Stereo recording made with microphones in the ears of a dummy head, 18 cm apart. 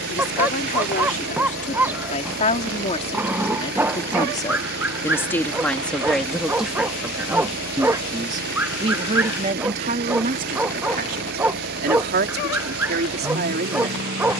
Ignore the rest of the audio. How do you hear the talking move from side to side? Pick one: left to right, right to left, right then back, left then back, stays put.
left to right.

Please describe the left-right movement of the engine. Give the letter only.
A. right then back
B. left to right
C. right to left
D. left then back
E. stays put
E.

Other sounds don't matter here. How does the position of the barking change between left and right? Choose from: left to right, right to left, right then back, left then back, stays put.
stays put.